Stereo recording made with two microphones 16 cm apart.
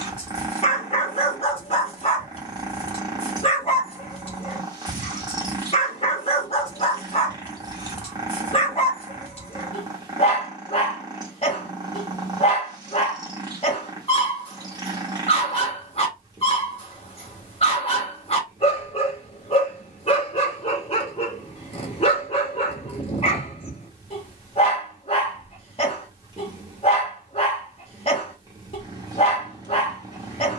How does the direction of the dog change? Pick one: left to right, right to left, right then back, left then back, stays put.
stays put.